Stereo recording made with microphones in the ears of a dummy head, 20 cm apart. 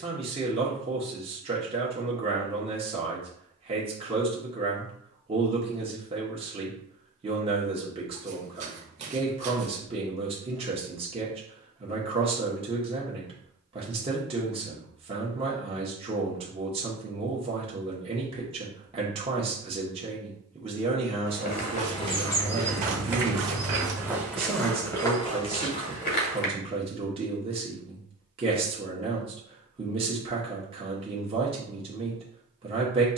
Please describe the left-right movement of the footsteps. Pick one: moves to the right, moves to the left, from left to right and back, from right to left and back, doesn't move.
from left to right and back.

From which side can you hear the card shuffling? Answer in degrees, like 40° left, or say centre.
30° right.